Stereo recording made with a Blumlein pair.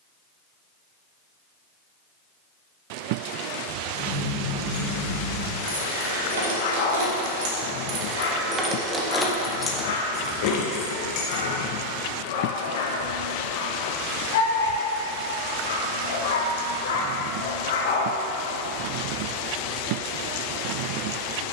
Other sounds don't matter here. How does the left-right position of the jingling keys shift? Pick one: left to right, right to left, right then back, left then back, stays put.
right to left.